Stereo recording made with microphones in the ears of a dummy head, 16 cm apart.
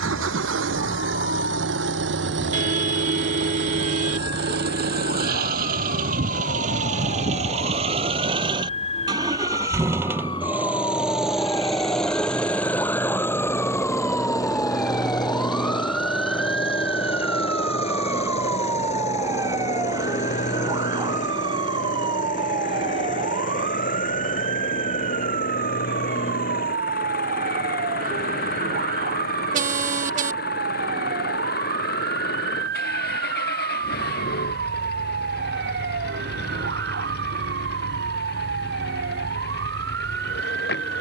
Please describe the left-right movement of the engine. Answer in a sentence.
You can hear the engine move from right to left.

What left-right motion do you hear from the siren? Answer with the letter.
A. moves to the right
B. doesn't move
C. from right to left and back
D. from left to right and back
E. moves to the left
A.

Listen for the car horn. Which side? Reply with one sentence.
In this clip you hear the car horn on the right.